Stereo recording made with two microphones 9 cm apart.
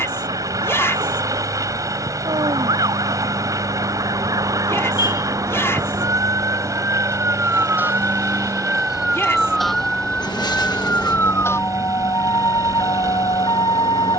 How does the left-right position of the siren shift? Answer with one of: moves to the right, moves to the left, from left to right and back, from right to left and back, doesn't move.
moves to the left.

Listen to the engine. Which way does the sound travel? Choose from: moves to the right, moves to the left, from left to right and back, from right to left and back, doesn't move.
doesn't move.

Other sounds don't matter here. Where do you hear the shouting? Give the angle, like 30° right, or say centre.
30° left.